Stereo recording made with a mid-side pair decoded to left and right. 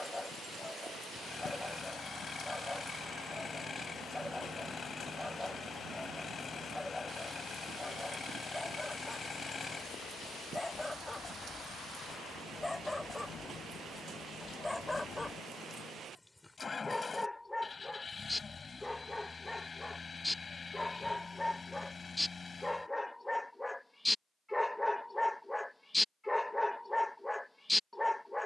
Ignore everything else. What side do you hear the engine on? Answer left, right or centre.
left.